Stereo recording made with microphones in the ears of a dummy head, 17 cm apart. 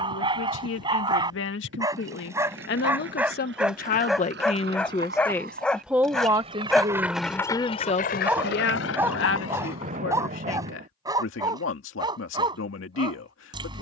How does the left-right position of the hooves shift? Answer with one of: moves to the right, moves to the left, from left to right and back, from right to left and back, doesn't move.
moves to the left.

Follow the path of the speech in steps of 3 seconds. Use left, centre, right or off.
left, left, centre, left, left.